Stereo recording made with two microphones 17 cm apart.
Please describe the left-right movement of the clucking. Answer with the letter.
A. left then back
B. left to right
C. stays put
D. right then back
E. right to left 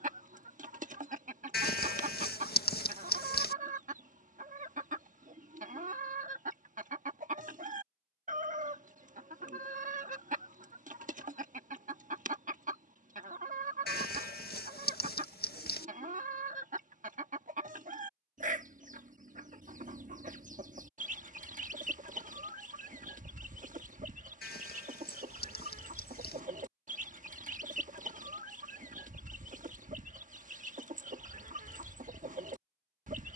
C.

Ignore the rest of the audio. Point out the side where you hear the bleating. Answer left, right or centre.
left.